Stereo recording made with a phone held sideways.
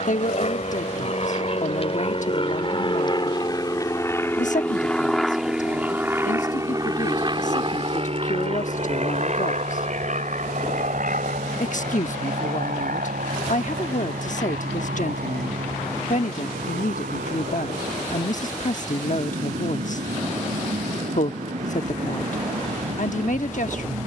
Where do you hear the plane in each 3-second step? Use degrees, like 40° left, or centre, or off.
50° left, 10° left, 30° right, 60° right, 70° right, 70° right, 80° right, 80° right.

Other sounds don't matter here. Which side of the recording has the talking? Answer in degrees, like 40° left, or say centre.
70° left.